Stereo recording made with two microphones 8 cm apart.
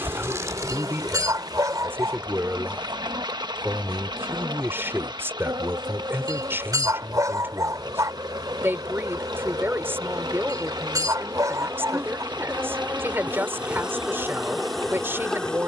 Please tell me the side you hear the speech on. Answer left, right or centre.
right.